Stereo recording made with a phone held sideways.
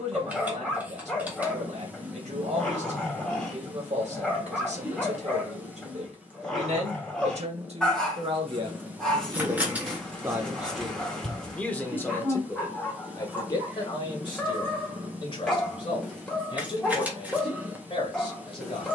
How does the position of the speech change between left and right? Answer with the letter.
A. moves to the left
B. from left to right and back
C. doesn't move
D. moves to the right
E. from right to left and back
A.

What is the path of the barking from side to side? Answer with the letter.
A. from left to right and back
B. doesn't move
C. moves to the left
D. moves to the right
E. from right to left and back
B.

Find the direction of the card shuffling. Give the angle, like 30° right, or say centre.
10° right.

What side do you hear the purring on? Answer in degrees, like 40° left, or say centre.
10° right.